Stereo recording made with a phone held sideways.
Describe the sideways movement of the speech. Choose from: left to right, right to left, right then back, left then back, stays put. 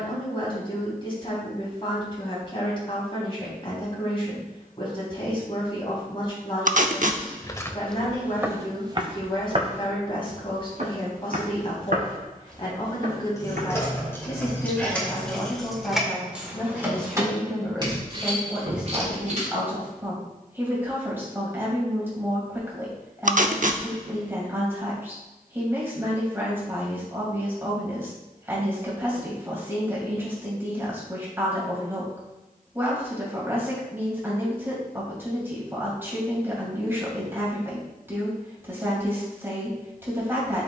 left to right.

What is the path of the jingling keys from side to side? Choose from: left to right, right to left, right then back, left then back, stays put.
left to right.